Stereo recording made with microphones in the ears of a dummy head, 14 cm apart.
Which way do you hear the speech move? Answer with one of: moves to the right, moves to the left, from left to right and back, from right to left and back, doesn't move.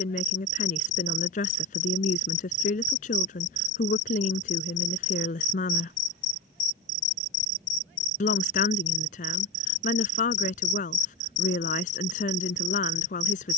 doesn't move.